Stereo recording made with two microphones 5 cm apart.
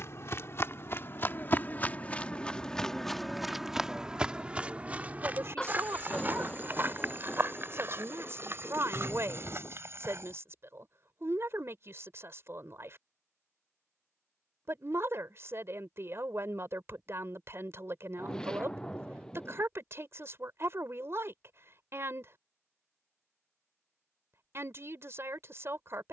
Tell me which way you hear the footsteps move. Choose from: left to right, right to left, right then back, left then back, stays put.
left to right.